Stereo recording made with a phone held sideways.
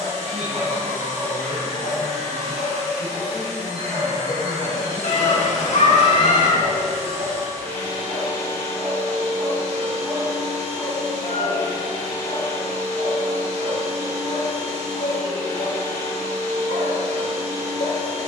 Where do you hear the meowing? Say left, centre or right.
left.